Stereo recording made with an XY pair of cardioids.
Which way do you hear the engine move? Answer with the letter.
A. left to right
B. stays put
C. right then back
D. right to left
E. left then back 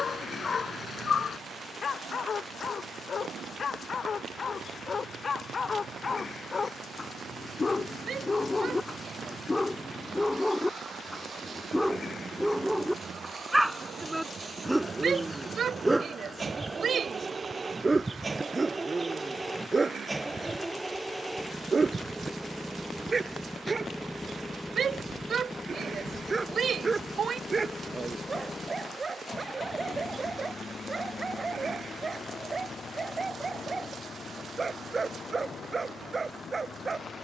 D.